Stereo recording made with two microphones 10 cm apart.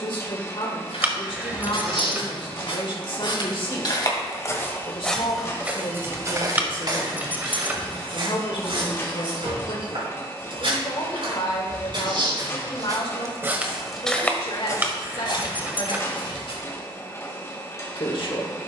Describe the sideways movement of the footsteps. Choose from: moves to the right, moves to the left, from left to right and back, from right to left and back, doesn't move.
from left to right and back.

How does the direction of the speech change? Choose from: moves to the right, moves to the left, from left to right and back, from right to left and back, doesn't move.
doesn't move.